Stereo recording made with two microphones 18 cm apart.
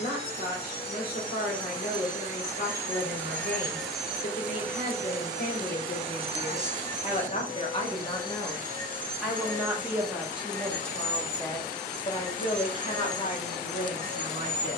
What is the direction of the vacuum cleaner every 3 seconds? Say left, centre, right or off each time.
left, centre, right, right, right.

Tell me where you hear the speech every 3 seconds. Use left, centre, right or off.
left, left, left, centre, left.